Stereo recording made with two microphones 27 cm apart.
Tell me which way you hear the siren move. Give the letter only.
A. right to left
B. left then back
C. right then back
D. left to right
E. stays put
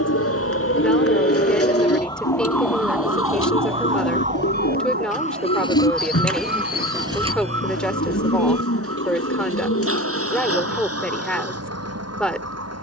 D.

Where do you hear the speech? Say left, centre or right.
centre.